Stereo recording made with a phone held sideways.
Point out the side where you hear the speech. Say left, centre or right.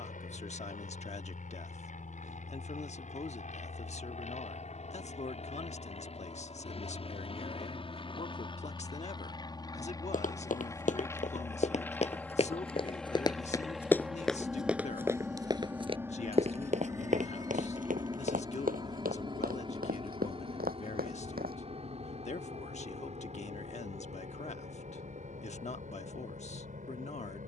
left.